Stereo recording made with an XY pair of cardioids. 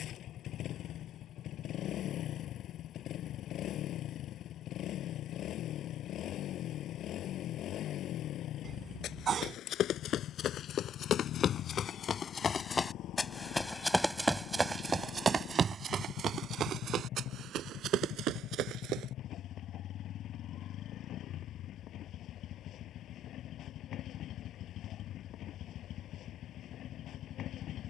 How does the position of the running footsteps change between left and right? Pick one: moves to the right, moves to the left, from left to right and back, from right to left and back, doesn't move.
moves to the right.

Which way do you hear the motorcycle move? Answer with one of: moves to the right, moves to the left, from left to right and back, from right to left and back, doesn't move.
doesn't move.